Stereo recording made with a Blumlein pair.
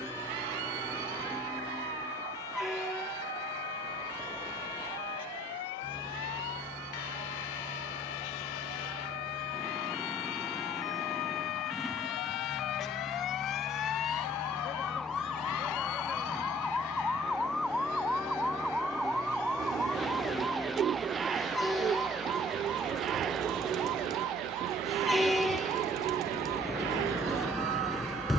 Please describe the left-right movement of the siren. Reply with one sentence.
You can hear the siren move from left to right.